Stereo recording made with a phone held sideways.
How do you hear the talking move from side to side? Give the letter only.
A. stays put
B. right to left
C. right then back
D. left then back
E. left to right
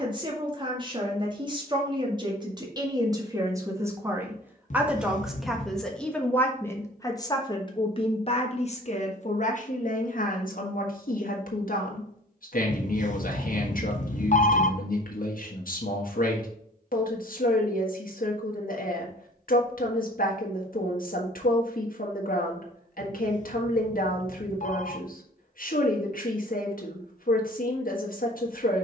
B.